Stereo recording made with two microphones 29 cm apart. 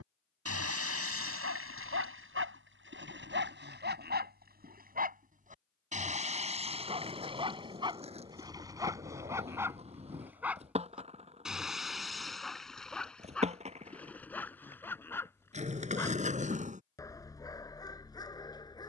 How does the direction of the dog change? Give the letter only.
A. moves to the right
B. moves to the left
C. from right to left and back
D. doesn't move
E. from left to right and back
B.